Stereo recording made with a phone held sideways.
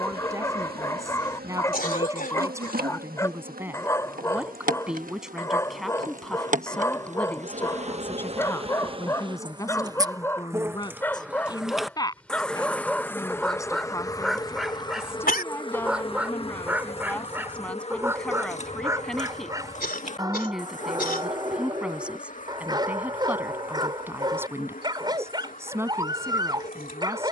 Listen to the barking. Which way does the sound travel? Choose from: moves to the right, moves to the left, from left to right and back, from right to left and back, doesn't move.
moves to the right.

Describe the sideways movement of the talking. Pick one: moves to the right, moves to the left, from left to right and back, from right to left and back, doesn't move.
from right to left and back.